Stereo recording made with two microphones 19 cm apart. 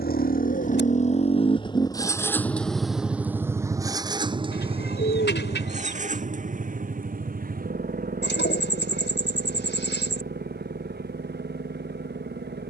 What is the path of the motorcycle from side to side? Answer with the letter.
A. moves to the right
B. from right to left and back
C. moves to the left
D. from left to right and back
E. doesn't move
A.